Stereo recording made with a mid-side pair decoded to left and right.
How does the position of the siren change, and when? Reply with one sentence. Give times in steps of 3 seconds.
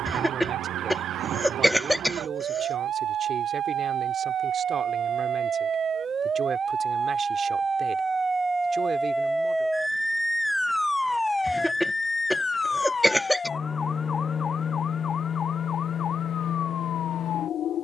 In this clip you hear the siren on the right from 0 s, in the centre from 9 s and on the left from 12 s.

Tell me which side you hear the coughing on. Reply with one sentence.
In this clip you hear the coughing in the centre.